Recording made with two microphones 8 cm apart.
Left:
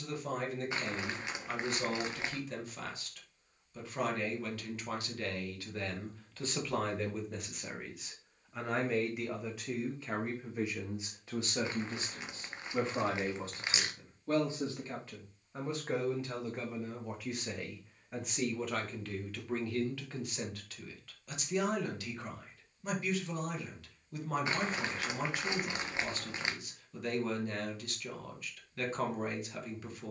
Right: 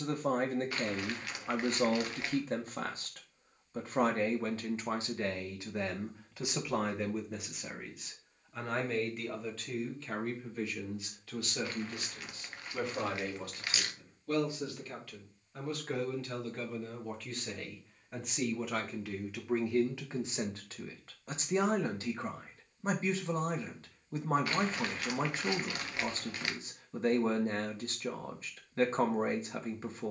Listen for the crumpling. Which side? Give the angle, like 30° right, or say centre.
20° left.